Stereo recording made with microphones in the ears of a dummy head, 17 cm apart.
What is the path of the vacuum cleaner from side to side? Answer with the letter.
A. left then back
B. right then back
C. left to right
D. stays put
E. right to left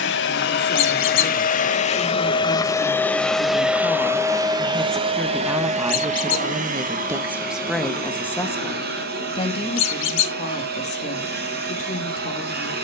C.